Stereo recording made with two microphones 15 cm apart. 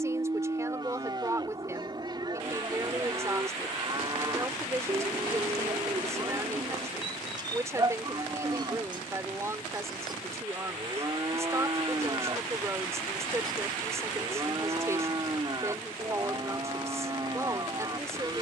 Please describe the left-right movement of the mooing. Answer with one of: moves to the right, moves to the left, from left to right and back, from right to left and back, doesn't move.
doesn't move.